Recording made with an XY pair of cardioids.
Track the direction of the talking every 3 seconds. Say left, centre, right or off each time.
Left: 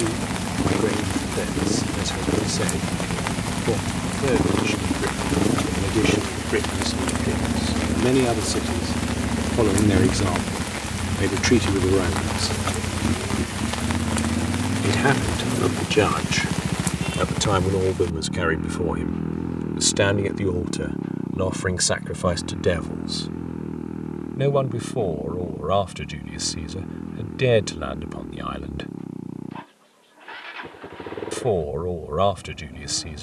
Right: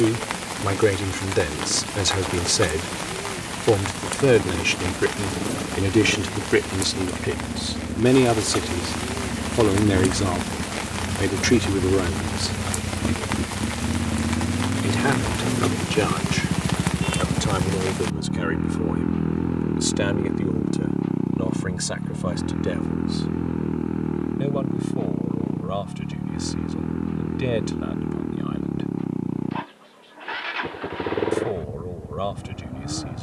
right, right, right, centre, centre, left, left, left, left, left, left.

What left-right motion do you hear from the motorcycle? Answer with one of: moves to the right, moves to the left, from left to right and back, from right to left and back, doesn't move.
moves to the right.